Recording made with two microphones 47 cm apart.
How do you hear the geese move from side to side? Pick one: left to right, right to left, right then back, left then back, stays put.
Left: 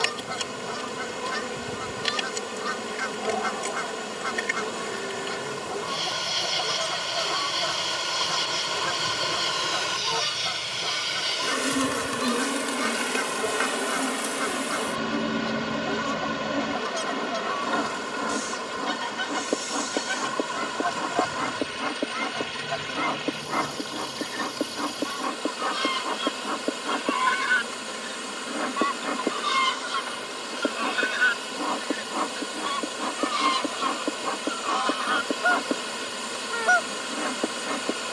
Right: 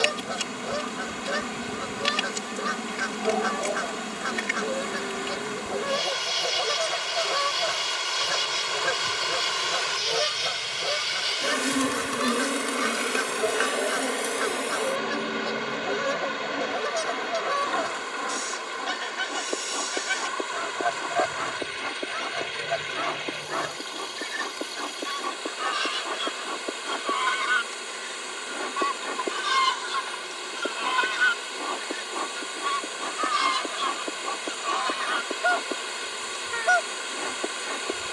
left to right.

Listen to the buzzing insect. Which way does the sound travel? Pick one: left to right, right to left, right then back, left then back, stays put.
right to left.